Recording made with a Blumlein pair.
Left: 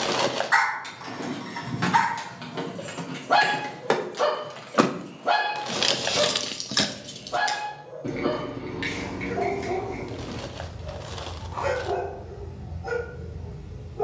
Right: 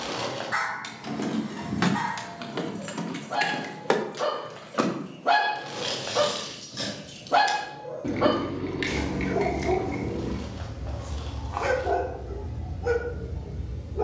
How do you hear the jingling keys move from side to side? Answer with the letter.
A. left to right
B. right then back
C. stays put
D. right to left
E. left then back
E.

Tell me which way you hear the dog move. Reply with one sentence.
You can hear the dog move from left to right.